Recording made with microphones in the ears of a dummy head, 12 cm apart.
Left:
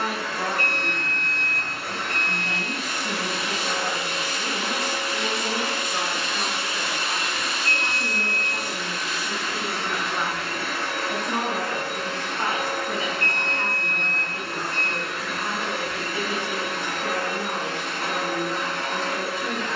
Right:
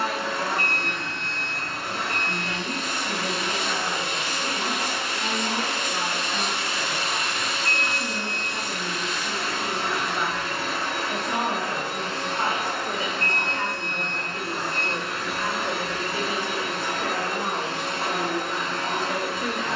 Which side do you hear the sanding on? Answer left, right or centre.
centre.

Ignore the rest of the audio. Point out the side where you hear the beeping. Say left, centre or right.
right.